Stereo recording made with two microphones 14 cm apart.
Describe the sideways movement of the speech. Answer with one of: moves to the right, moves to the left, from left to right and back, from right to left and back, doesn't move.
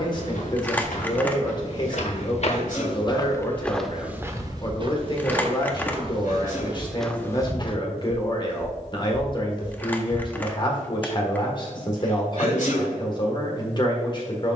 doesn't move.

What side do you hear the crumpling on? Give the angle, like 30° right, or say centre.
10° left.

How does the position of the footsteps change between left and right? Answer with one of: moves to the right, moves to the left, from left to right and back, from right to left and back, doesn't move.
from left to right and back.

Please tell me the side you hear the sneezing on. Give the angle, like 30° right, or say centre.
70° left.